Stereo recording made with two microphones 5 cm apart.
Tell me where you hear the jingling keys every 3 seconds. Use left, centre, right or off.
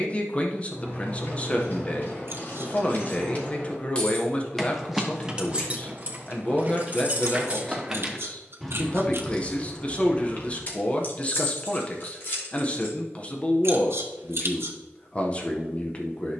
left, centre, right, left, left, off.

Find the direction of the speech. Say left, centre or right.
left.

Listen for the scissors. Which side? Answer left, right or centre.
right.